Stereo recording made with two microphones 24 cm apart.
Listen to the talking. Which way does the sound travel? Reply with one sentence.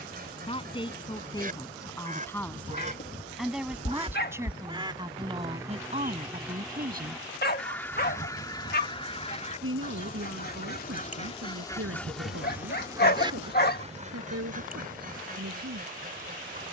In this clip you hear the talking go from the left side to the right.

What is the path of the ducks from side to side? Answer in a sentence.
In this clip you hear the ducks move from right to left and back again.